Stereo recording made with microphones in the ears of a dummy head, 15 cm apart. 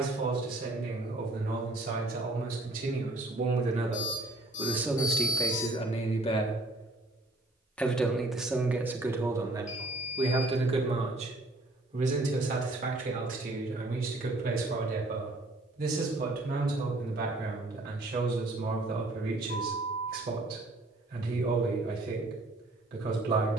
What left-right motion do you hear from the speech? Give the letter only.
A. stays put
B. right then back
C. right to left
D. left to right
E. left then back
E.